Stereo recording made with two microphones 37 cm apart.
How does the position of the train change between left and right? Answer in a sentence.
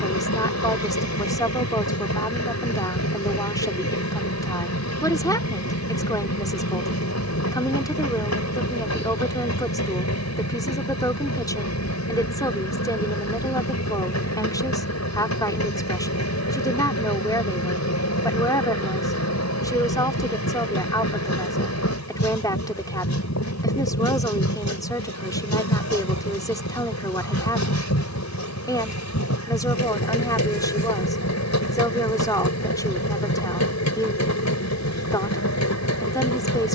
You can hear the train stay put.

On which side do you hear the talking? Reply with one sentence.
In this clip you hear the talking in the centre.